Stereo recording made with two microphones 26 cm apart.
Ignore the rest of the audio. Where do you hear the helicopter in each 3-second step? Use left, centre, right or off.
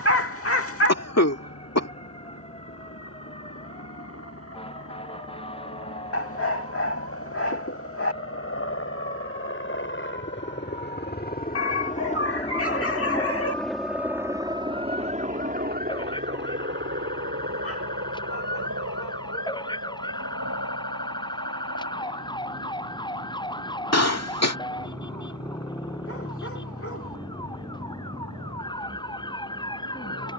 left, left, left, left, centre, right, right, right, right, right.